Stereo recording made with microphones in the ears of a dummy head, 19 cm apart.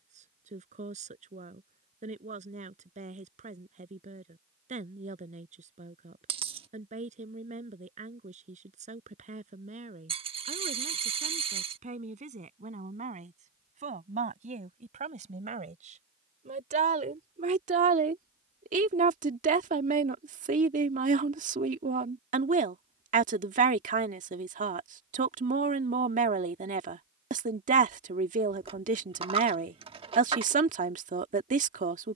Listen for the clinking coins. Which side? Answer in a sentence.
You can hear the clinking coins on the right.